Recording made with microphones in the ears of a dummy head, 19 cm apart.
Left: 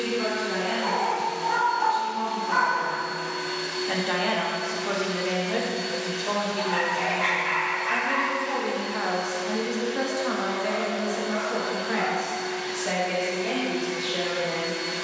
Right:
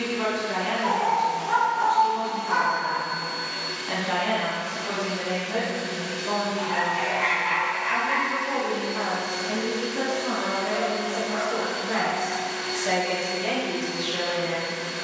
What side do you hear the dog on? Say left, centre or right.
centre.